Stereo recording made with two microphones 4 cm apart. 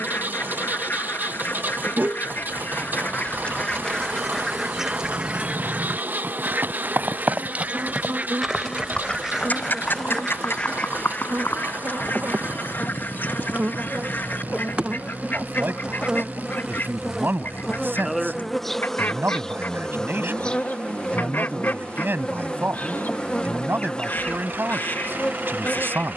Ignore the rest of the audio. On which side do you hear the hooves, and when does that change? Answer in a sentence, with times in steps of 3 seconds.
In this clip you hear the hooves on the right from 0 s, on the left from 9 s and not at all from 15 s.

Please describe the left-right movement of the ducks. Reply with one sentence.
In this clip you hear the ducks move from left to right and back again.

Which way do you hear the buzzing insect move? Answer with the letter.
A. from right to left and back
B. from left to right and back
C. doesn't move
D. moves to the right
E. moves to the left
E.